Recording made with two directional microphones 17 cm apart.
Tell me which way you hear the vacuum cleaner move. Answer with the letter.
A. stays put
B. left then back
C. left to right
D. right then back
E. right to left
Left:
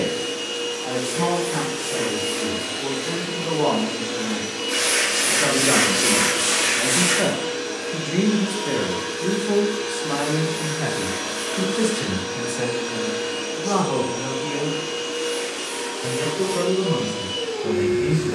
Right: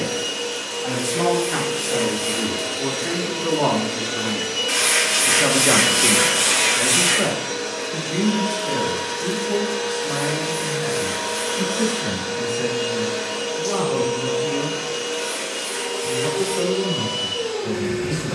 A.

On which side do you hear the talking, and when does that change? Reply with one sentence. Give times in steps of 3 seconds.
You can hear the talking on the right from 0 s, in the centre from 6 s and on the left from 9 s.